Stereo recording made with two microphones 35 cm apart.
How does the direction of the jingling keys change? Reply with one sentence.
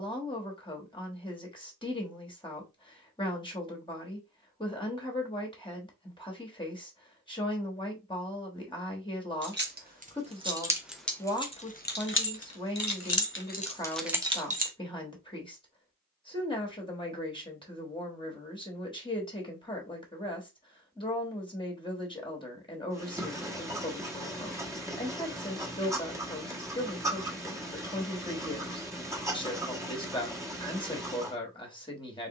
You can hear the jingling keys go left and come back.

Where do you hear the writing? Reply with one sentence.
You can hear the writing in the centre.